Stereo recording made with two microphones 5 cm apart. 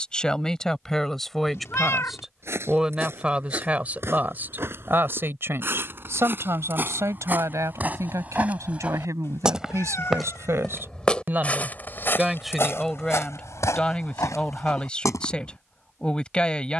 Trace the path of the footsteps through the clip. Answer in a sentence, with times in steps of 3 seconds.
In this clip you hear the footsteps on the right from 0 s, in the centre from 9 s and on the left from 12 s.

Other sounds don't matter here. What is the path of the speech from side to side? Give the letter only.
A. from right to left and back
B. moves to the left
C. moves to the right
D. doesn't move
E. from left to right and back
E.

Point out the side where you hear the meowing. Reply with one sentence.
In this clip you hear the meowing on the left.